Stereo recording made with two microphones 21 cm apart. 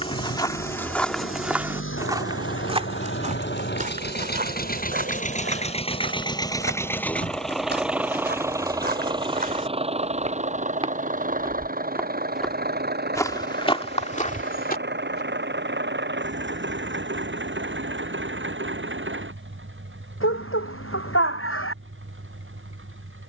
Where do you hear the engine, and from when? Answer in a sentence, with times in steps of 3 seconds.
In this clip you hear the engine on the left from 0 s, in the centre from 6 s and on the right from 9 s.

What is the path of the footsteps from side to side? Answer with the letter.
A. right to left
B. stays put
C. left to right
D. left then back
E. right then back
E.